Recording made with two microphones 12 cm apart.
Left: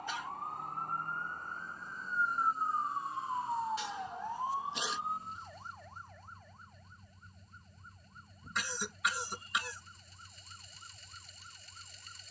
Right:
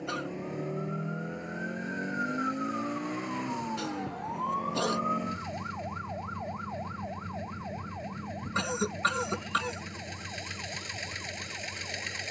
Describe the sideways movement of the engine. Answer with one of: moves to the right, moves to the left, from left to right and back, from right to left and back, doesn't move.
doesn't move.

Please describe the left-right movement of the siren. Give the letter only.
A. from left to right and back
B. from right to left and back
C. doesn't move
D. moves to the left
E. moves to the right
E.